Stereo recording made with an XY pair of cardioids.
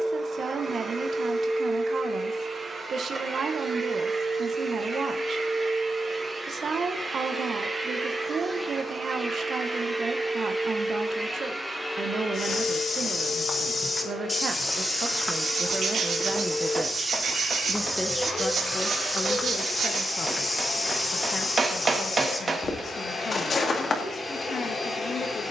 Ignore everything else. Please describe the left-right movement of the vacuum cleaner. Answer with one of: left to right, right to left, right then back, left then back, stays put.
right to left.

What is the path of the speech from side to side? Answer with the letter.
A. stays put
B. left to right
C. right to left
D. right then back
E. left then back
C.